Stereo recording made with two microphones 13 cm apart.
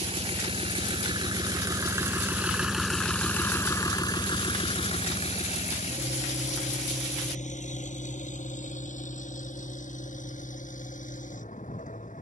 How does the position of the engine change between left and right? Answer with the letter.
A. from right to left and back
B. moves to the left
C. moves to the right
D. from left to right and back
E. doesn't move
B.